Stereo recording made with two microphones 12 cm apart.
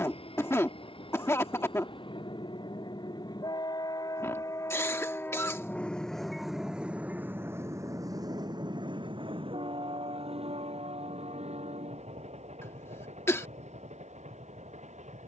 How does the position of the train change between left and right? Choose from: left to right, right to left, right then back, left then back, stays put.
left to right.